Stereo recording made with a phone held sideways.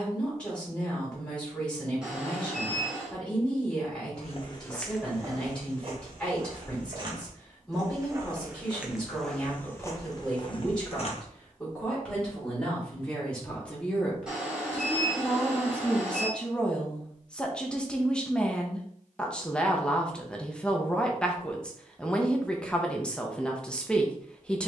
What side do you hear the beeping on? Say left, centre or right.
centre.